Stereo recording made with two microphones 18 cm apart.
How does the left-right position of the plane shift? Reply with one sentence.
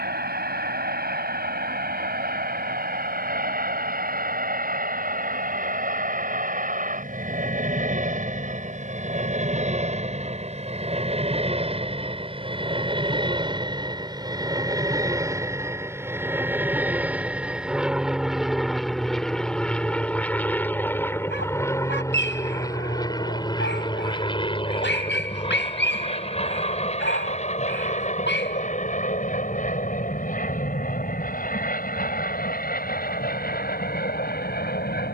You can hear the plane move to the left.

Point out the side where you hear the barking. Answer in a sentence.
In this clip you hear the barking on the left.